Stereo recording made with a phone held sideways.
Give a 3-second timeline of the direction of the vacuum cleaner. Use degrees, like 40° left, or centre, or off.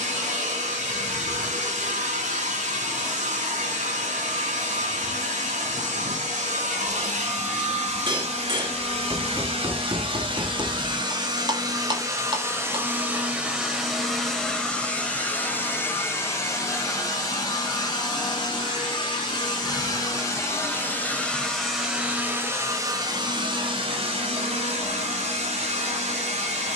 60° right, 60° right, 60° right, 40° right, 10° right, 20° left, 30° left, 20° right, 50° right.